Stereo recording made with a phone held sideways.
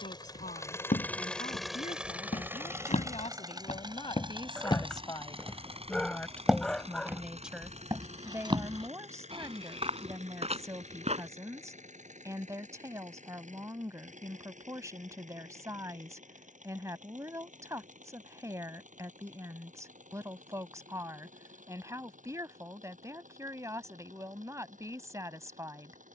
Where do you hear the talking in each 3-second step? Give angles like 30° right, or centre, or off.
60° left, 30° left, centre, 20° right, 20° right, 20° right, 20° right, 20° right, 20° right.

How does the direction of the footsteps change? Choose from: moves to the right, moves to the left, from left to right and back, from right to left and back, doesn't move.
moves to the right.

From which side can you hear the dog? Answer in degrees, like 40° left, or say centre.
centre.